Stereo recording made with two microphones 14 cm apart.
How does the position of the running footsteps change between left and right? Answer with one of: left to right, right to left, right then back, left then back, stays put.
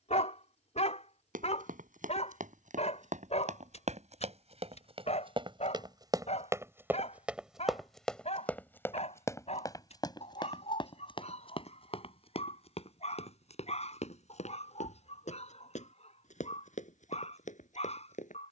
right to left.